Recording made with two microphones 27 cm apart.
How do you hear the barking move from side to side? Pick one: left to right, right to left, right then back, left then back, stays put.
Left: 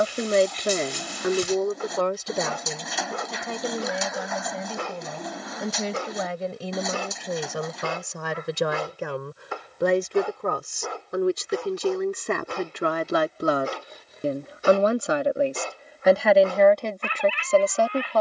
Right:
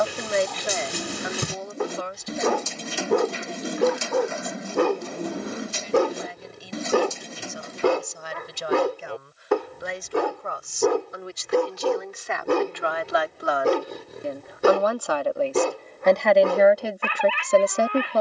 stays put.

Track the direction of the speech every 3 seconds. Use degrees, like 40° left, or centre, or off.
60° left, 80° left, 80° left, 70° left, 40° left, centre.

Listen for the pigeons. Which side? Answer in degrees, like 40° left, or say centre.
30° right.